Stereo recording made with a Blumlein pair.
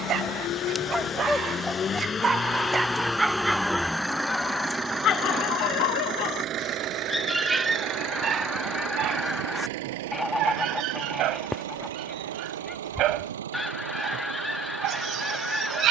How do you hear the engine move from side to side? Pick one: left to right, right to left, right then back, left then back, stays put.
left to right.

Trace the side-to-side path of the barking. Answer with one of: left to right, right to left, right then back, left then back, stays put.
left then back.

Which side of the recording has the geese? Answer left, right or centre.
centre.